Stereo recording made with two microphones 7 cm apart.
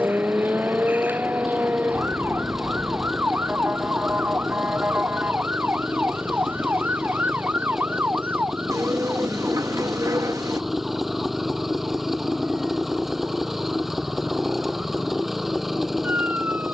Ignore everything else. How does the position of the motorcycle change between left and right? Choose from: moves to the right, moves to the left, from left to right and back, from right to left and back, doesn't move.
doesn't move.